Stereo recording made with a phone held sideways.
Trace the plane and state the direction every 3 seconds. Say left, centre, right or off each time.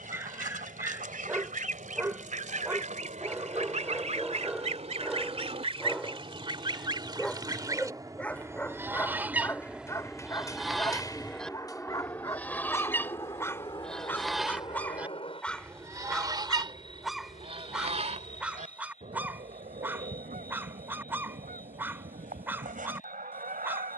right, right, right, centre, left, left, left, left.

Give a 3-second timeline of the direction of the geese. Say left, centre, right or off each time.
right, right, right, centre, centre, right, right, right.